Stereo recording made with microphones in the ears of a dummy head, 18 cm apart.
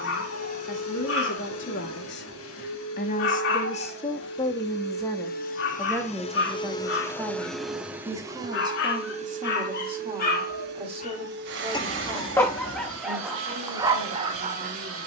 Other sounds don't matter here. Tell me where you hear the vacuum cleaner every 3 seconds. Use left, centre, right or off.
left, left, centre, right, right.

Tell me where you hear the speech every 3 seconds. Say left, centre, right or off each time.
left, left, centre, right, right.